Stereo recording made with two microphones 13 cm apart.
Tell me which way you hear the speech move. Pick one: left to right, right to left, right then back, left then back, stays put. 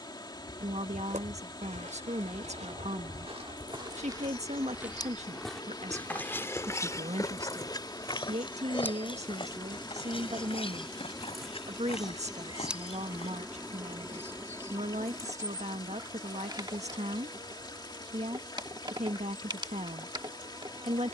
stays put.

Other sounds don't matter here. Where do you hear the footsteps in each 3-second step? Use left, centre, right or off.
right, right, left, left, left, off, off.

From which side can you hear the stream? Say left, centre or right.
left.